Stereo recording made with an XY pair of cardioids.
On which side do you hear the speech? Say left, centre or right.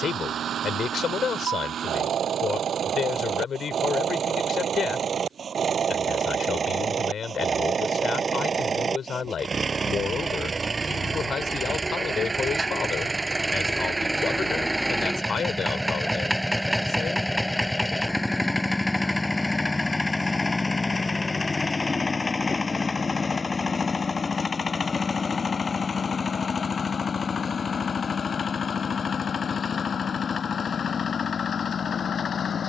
left.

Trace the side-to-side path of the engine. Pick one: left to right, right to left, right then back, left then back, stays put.
right to left.